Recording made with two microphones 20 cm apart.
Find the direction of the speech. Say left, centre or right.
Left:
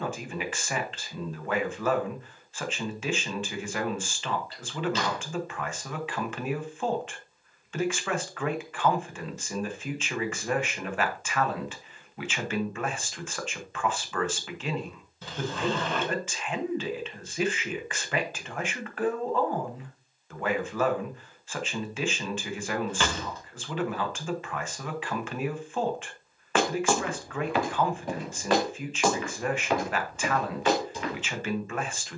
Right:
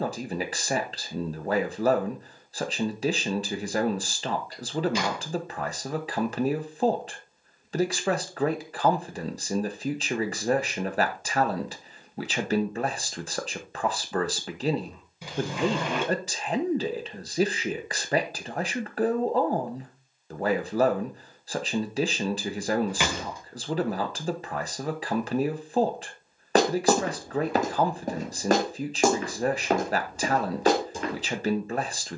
right.